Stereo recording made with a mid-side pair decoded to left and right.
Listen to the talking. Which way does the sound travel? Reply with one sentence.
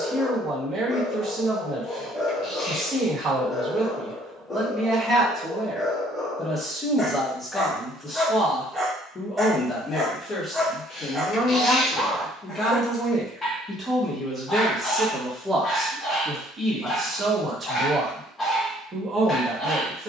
You can hear the talking go left and come back.